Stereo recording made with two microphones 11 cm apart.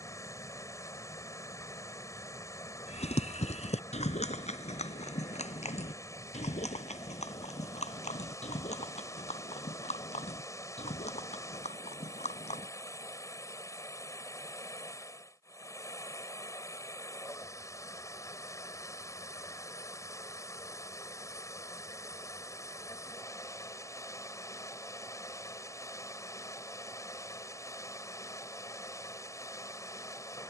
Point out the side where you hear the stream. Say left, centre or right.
left.